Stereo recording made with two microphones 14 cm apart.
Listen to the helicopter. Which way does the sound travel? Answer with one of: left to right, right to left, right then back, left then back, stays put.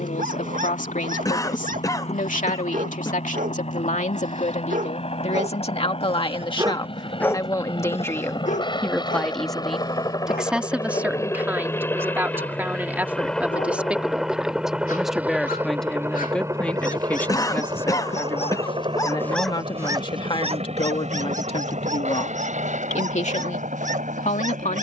left to right.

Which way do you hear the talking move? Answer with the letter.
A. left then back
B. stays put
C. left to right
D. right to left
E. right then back
E.